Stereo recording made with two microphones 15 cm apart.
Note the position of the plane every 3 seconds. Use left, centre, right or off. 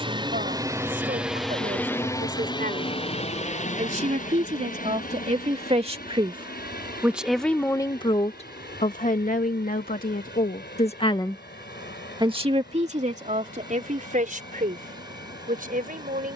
centre, left, left, left, left, left.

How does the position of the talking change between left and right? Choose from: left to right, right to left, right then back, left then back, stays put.
left then back.